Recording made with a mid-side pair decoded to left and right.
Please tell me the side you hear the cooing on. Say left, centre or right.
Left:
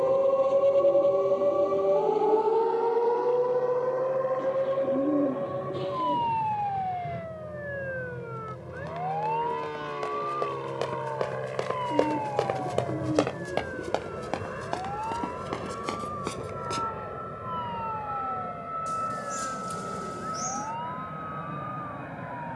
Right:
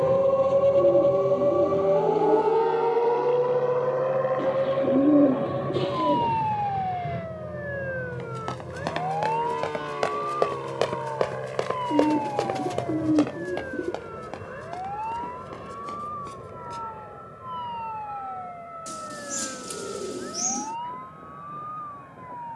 right.